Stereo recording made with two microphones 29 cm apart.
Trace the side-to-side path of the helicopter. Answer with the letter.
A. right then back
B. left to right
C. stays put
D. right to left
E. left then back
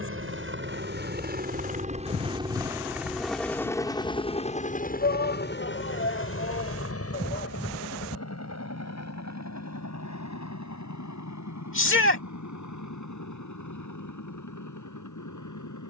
D.